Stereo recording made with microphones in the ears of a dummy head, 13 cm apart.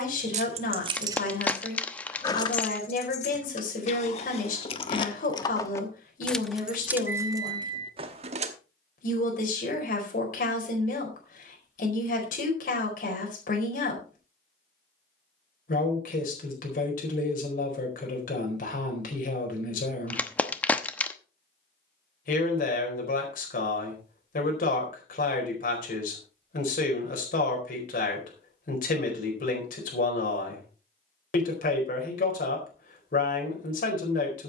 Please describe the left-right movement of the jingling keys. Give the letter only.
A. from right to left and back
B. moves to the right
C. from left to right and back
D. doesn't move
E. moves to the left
A.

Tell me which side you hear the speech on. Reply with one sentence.
You can hear the speech on the left.